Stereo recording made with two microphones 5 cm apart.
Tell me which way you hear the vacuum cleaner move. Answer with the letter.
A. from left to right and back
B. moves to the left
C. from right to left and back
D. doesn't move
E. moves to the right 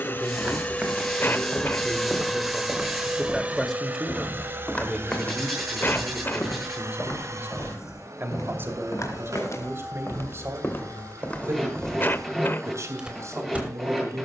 E.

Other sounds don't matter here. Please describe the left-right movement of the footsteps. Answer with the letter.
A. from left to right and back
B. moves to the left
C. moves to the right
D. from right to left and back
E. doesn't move
D.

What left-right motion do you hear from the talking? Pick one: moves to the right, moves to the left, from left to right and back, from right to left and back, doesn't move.
moves to the right.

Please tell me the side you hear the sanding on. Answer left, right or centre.
centre.